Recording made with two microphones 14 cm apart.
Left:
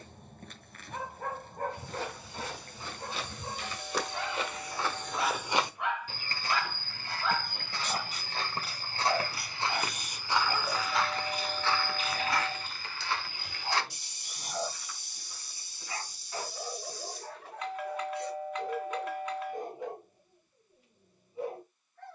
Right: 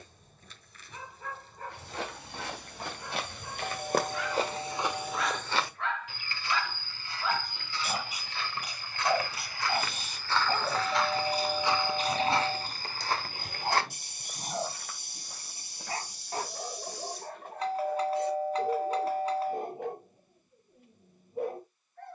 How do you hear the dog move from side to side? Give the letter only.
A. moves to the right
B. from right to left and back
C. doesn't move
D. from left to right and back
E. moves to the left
A.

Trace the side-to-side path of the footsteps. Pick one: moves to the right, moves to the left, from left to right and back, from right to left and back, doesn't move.
from right to left and back.